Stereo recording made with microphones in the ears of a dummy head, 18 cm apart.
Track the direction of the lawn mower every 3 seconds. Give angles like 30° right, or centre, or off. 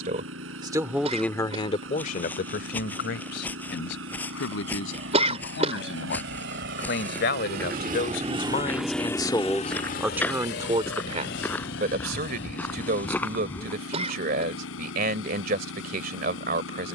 80° right, 80° right, 50° right, 50° left, 80° left, 80° left.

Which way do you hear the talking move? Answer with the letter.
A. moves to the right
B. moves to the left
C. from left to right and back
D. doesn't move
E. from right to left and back
E.